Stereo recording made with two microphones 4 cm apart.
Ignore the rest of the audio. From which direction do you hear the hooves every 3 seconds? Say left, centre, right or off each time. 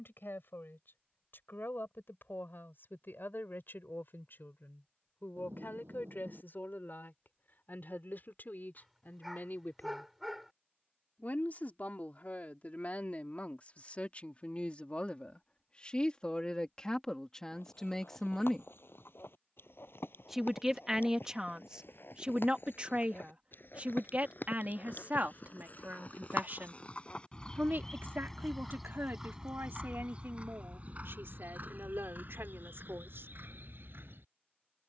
off, off, off, off, off, left, left, left, left, centre, right, right.